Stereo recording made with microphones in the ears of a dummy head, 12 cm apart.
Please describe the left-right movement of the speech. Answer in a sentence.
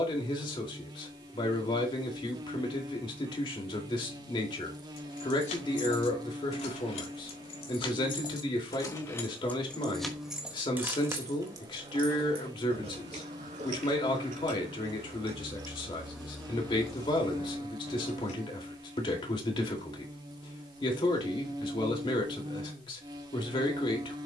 You can hear the speech stay put.